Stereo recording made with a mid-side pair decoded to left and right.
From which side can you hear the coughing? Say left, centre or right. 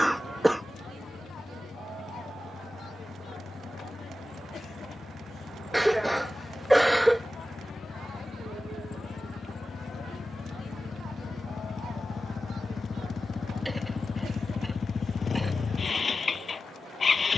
centre.